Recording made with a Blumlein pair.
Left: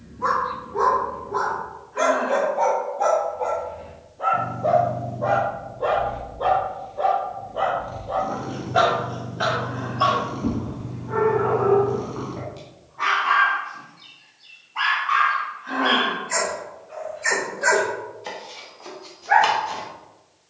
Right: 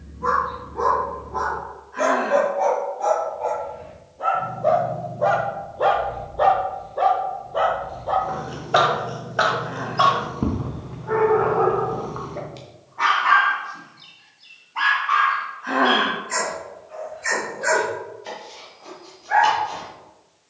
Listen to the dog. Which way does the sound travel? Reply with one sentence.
In this clip you hear the dog go right and come back.